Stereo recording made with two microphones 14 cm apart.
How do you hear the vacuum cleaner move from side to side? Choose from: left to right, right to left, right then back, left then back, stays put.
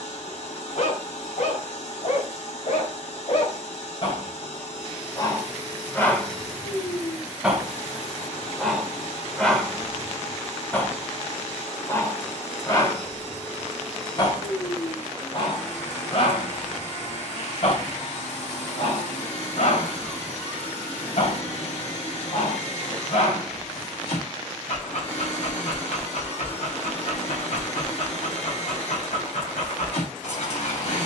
stays put.